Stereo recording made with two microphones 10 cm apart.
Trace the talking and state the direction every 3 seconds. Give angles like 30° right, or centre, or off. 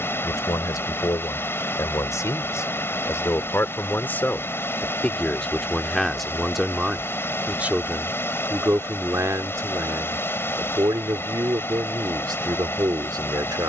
40° left, 20° left, 10° right, 40° right, 40° right.